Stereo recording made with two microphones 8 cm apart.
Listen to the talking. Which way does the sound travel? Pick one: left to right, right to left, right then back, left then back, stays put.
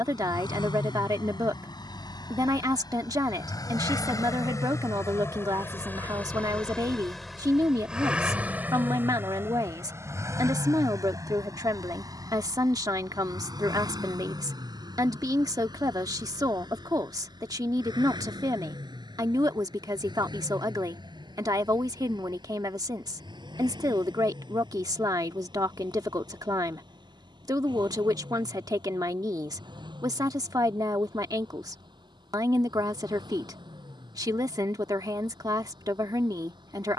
stays put.